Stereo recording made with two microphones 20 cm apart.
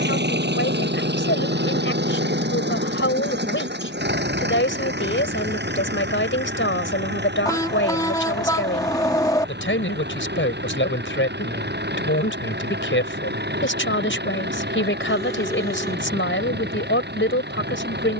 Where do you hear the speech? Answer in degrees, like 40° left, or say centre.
80° left.